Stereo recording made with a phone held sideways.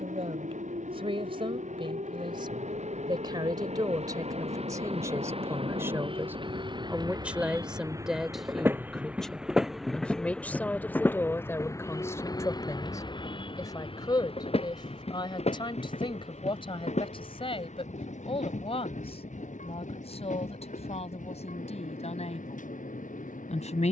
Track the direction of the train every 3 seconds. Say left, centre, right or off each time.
right, right, right, centre, left, left, left, left.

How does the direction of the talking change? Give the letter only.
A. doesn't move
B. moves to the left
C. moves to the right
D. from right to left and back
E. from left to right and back
B.